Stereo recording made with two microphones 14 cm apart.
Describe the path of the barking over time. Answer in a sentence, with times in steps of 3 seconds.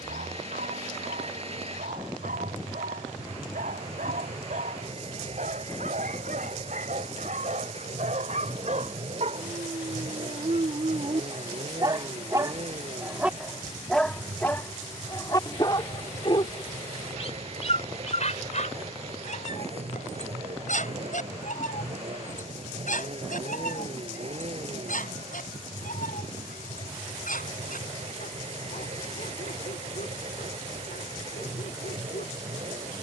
You can hear the barking on the right from 0 s, in the centre from 12 s and on the left from 15 s.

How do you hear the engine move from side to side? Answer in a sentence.
You can hear the engine stay put.